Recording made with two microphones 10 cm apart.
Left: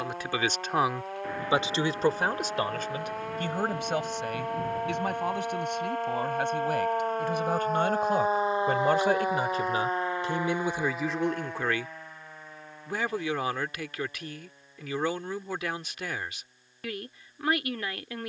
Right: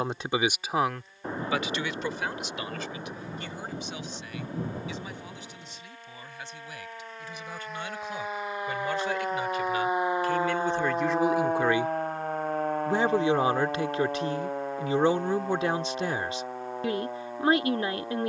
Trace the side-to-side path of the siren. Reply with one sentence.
In this clip you hear the siren travel towards the right.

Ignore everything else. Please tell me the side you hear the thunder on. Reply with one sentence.
In this clip you hear the thunder on the right.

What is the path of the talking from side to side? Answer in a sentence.
You can hear the talking move from right to left and back again.